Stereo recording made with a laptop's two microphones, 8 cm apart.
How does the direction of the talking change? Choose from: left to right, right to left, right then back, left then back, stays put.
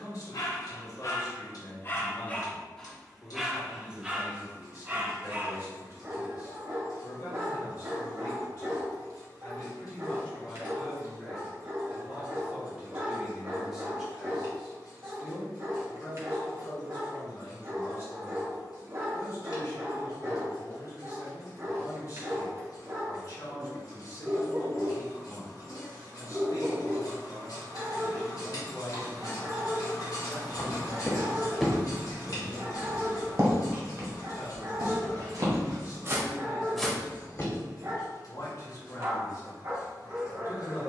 right then back.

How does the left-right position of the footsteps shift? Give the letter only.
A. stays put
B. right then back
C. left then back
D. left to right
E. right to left
B.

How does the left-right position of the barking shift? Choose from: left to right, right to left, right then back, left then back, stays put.
left to right.